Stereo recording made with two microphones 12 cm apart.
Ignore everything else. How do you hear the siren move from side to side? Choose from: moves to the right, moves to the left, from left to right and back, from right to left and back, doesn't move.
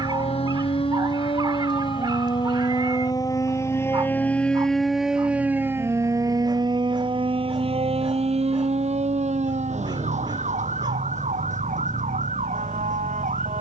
moves to the right.